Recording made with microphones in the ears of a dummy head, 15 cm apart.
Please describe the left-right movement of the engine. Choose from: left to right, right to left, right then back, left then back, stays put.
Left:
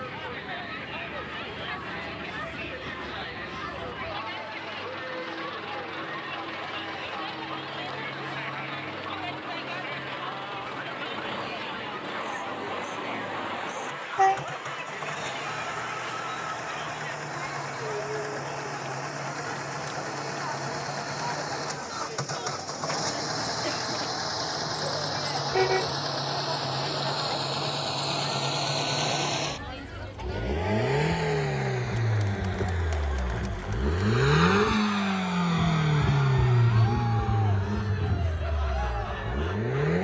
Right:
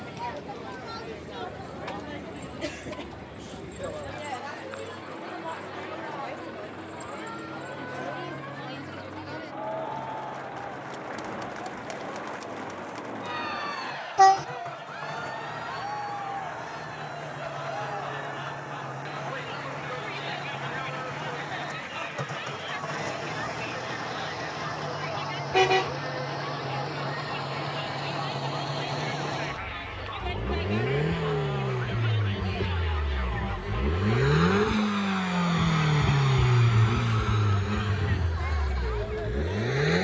left to right.